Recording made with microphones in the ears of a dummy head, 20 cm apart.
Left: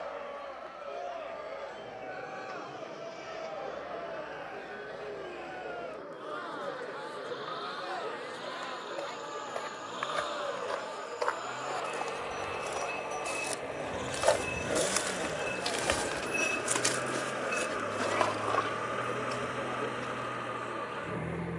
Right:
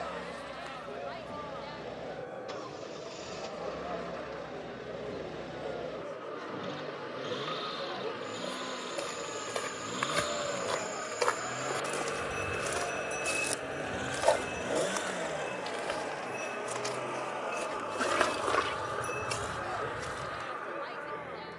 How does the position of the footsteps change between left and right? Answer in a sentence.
You can hear the footsteps go left and come back.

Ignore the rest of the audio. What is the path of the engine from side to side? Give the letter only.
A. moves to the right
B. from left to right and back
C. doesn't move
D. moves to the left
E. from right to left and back
D.